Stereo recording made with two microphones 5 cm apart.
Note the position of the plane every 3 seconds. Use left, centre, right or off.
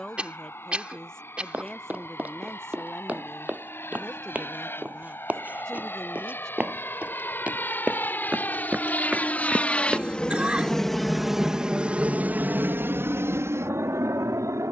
left, left, left, centre, right.